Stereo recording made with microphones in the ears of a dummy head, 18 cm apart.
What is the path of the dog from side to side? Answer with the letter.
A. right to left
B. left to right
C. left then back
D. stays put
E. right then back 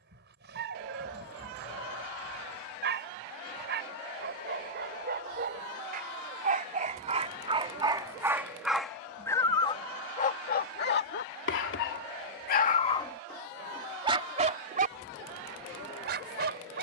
C.